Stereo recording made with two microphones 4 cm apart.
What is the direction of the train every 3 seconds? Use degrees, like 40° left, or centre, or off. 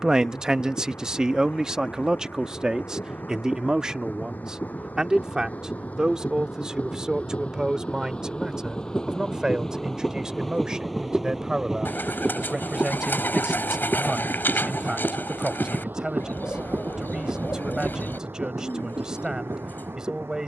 50° left, 50° left, 30° left, centre, 30° right, 60° right, 70° right.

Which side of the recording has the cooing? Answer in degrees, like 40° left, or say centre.
60° left.